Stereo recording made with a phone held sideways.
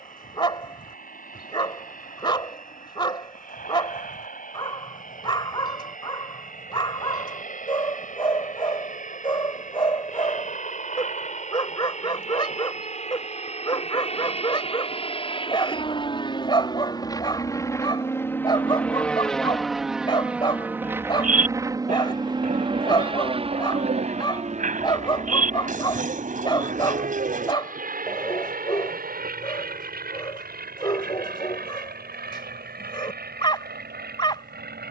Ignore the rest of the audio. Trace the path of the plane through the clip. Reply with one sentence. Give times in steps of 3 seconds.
In this clip you hear the plane on the left from 0 s, in the centre from 18 s and on the right from 21 s.